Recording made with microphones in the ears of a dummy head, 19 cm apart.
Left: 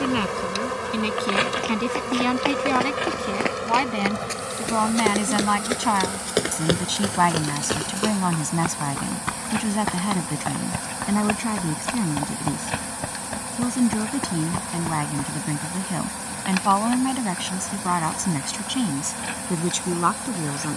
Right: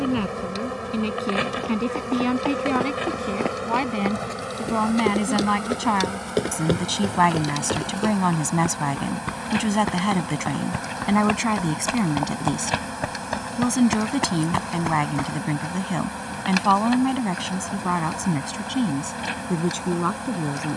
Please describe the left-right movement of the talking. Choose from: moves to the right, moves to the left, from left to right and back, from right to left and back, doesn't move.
from left to right and back.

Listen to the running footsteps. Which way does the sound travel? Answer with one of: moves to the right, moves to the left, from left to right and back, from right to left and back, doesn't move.
moves to the right.